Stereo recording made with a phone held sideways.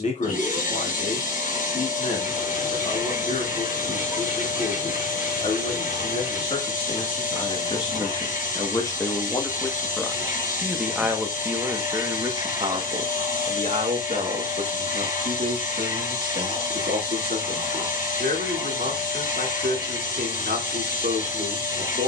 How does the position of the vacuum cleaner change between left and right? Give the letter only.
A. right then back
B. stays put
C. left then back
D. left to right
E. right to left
B.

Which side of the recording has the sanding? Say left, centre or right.
left.